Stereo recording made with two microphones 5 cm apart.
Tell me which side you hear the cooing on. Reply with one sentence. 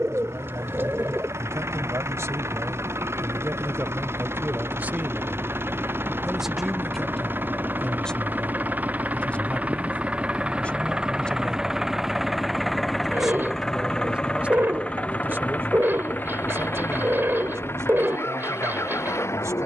You can hear the cooing on the right.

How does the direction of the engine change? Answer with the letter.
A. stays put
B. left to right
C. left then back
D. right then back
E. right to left
E.